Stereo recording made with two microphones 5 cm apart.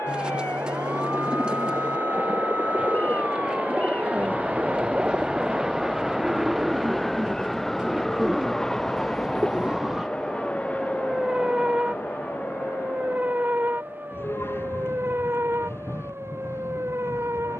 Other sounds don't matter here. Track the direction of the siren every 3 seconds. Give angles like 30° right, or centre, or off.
40° left, 30° left, 10° left, 10° right, 30° right, 50° right.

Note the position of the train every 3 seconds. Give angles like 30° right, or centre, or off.
40° right, 20° right, centre, 20° left, 40° left, 50° left.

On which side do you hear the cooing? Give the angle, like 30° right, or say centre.
20° right.